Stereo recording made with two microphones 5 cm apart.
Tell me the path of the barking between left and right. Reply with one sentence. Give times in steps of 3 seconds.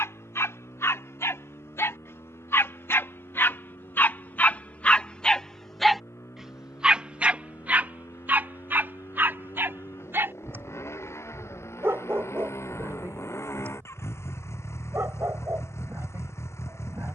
You can hear the barking on the left from 0 s and on the right from 6 s.